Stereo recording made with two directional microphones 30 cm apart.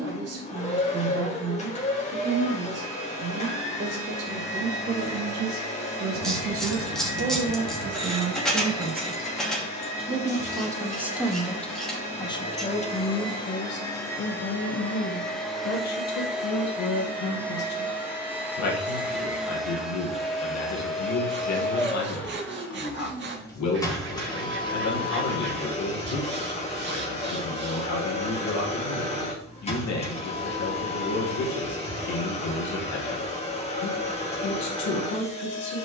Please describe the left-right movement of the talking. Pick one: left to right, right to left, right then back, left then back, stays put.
right to left.